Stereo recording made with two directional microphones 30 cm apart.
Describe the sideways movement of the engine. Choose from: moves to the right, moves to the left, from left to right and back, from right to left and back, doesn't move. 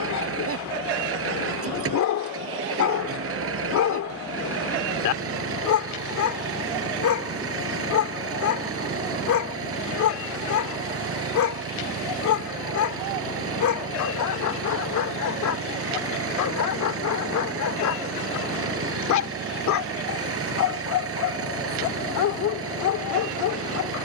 doesn't move.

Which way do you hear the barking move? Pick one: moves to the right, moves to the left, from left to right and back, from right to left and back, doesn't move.
doesn't move.